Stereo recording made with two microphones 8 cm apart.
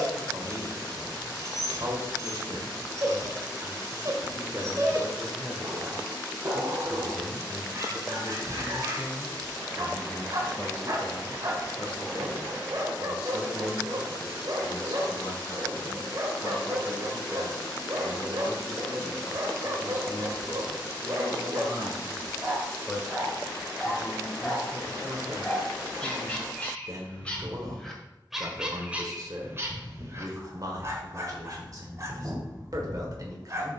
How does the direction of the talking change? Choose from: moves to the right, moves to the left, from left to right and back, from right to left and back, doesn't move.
from right to left and back.